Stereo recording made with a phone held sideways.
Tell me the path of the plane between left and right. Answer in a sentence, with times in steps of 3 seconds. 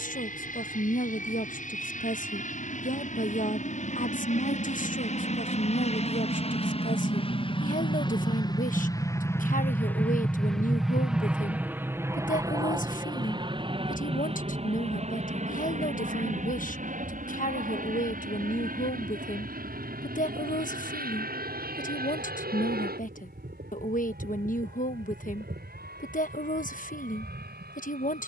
In this clip you hear the plane on the left from 0 s, in the centre from 9 s and on the right from 12 s.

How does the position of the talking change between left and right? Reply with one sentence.
In this clip you hear the talking stay put.